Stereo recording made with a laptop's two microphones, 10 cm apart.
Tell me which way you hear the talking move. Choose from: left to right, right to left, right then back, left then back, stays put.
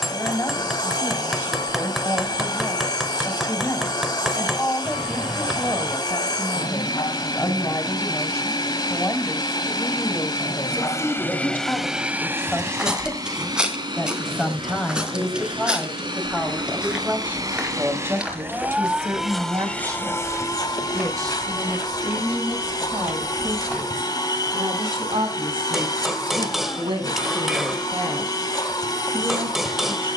left to right.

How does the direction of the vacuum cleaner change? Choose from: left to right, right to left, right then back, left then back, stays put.
right then back.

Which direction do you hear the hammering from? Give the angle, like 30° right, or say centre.
centre.